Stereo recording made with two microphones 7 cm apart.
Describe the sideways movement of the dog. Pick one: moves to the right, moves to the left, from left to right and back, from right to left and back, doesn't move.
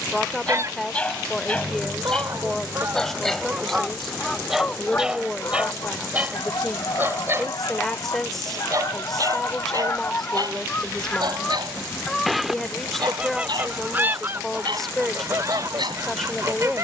moves to the right.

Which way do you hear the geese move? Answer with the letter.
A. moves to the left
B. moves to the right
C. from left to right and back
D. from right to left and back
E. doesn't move
D.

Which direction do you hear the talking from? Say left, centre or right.
centre.